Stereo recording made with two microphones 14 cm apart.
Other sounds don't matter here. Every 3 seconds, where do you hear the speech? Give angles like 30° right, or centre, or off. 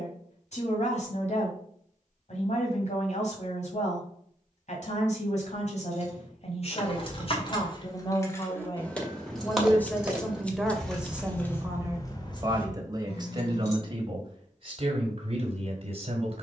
60° left, 60° left, 40° left, centre, 30° right, 50° right.